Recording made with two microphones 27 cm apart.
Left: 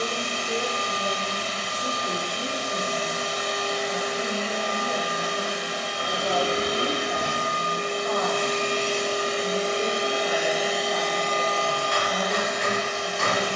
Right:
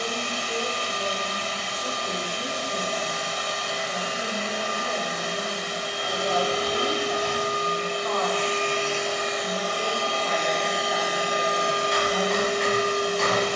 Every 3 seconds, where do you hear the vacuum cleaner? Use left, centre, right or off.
left, left, left, centre, right.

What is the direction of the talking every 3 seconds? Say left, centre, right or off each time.
left, centre, centre, left, left.